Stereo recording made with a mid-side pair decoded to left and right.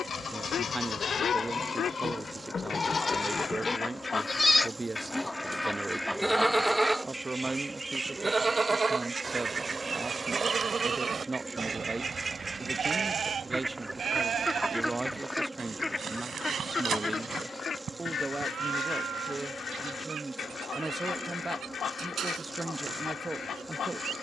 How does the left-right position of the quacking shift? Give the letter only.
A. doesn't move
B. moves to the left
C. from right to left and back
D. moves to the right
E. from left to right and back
E.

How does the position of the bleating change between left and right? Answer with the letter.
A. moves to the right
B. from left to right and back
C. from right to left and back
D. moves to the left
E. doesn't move
A.